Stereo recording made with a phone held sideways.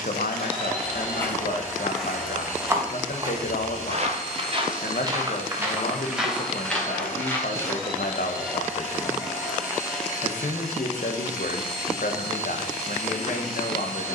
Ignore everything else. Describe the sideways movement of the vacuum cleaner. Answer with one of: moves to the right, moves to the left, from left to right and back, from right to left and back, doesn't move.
doesn't move.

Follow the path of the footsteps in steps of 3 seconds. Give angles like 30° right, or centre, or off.
centre, 30° right, 10° left, off, off.